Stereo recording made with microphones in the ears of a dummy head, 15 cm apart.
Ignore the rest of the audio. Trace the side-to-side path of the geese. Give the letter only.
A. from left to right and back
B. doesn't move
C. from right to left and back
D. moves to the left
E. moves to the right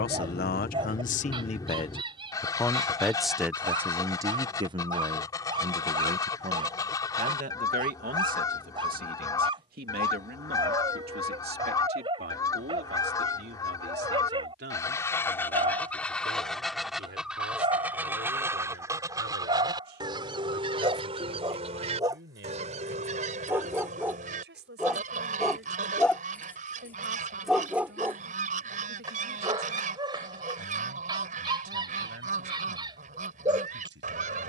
E.